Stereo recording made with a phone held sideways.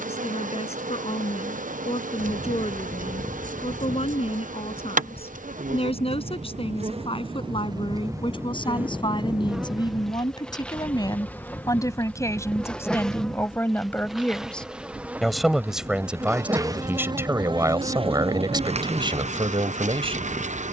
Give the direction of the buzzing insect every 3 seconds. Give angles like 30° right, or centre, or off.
70° right, 70° right, 30° right, centre, centre, 20° right, 50° right.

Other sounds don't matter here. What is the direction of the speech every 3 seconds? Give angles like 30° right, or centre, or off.
50° left, 50° left, 40° left, 30° left, 20° left, 10° right, 40° right.